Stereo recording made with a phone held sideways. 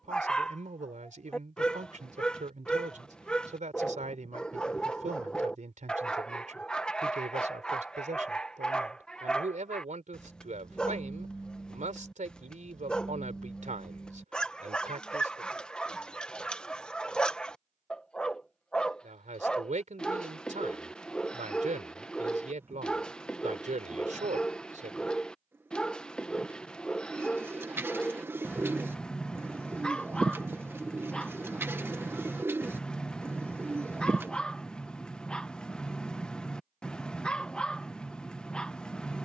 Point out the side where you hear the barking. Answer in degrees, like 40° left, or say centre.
10° left.